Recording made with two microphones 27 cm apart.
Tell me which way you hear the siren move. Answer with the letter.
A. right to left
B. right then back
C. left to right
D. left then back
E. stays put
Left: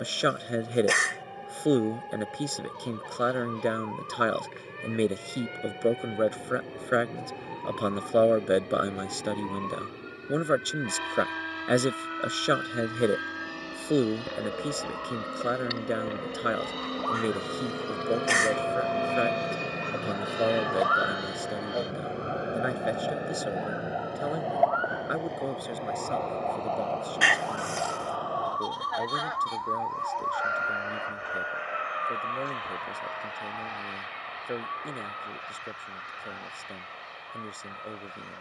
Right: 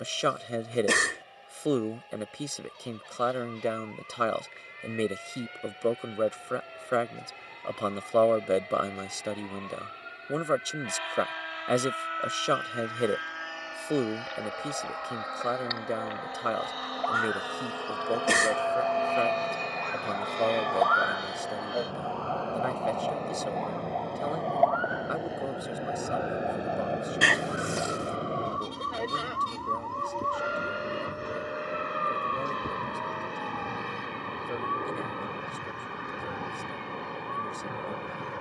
C.